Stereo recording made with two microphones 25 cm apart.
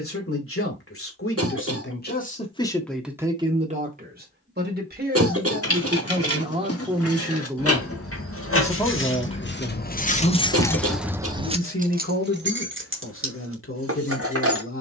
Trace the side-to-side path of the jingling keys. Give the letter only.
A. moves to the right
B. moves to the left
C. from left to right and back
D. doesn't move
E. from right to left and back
A.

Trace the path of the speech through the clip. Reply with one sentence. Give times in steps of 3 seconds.
In this clip you hear the speech on the left from 0 s, on the right from 3 s, in the centre from 6 s and on the left from 9 s.